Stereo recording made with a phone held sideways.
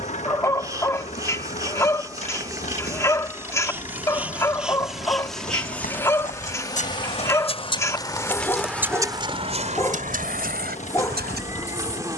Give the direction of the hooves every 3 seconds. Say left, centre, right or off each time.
left, left, left, right.